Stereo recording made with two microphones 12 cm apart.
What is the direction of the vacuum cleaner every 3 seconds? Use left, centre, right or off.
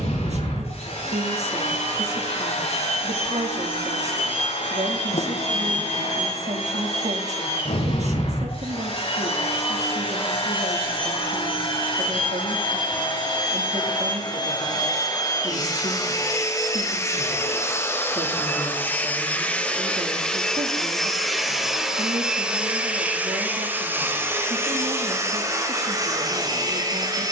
left, left, left, left, left, left, centre, centre, right.